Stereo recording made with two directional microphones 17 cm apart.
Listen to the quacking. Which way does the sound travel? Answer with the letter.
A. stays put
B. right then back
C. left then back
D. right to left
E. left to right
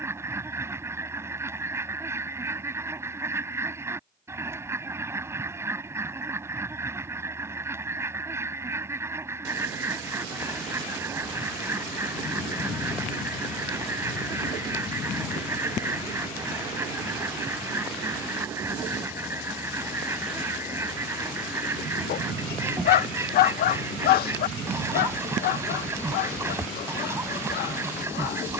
A.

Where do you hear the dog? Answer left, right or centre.
left.